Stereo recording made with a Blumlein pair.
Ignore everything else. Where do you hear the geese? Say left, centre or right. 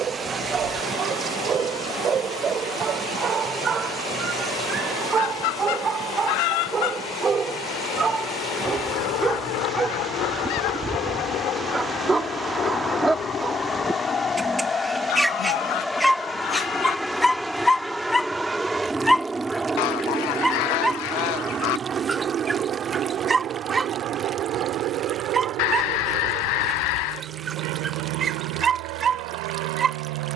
left.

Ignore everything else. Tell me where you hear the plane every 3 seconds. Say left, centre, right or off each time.
left, left, left, left, left, centre, centre, right, right, right.